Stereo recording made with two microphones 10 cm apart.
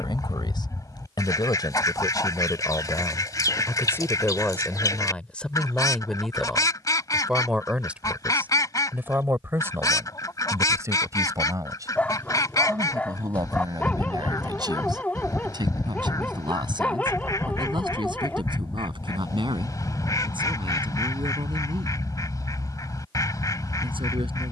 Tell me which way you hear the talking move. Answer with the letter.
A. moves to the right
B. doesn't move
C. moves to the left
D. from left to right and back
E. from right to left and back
A.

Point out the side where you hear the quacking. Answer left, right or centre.
left.